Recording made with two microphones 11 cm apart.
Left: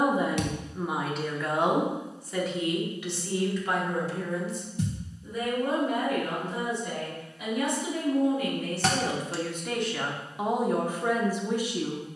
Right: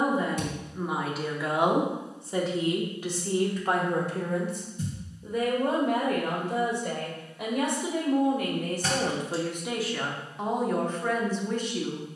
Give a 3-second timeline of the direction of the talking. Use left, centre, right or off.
centre, right, right, centre.